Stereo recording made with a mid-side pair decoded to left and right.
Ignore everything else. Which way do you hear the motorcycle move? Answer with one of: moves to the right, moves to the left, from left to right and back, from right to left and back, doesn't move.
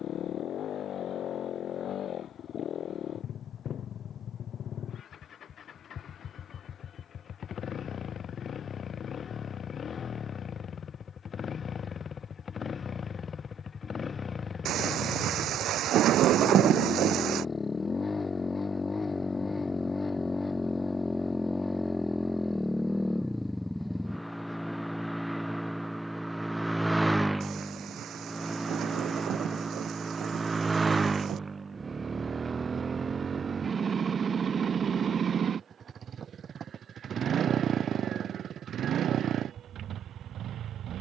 moves to the right.